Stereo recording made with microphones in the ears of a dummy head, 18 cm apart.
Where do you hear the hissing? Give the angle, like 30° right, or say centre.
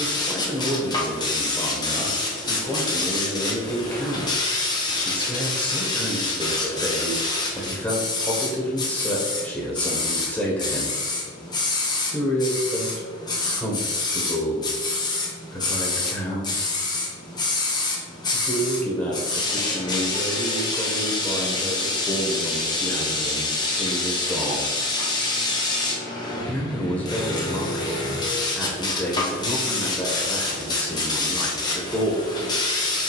20° left.